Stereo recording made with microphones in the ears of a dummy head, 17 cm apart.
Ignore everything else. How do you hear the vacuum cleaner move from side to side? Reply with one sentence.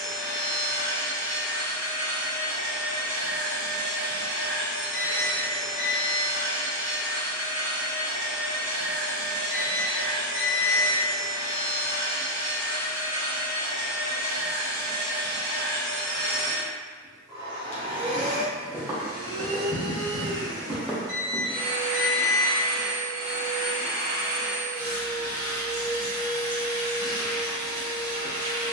In this clip you hear the vacuum cleaner go from the left side to the right.